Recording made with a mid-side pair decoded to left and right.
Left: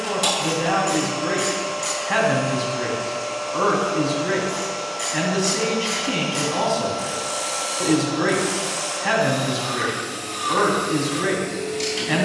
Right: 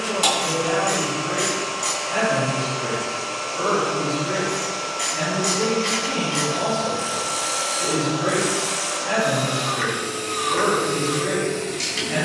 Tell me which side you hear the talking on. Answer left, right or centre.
left.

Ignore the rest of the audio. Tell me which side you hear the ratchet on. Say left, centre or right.
centre.